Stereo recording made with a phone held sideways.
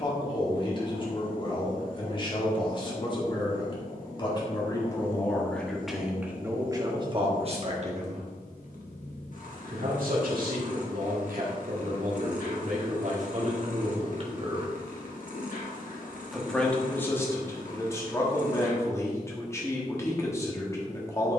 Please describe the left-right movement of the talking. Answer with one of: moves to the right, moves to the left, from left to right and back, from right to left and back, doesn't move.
from left to right and back.